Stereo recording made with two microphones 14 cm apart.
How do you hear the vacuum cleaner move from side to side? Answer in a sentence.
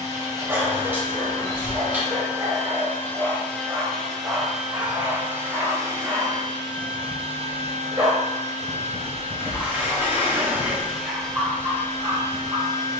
You can hear the vacuum cleaner go right and come back.